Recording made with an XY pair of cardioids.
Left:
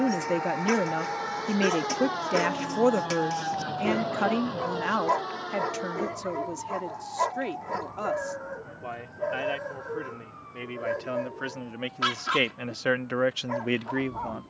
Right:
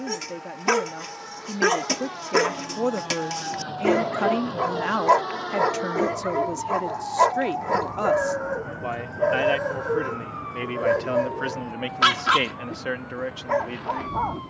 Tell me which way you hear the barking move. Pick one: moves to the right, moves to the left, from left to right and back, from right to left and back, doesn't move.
doesn't move.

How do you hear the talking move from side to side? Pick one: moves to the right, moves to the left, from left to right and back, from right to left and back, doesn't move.
from left to right and back.